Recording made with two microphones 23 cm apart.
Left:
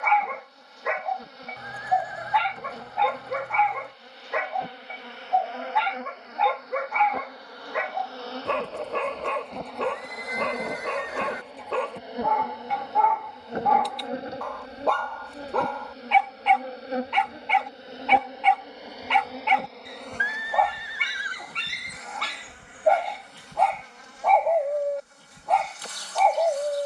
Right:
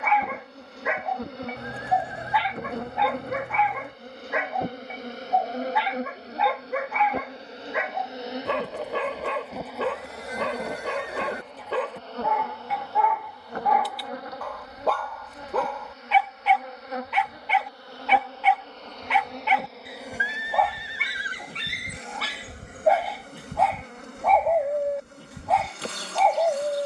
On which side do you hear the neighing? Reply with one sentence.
In this clip you hear the neighing on the right.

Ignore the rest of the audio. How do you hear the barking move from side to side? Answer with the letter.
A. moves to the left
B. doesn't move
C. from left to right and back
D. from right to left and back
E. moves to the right
B.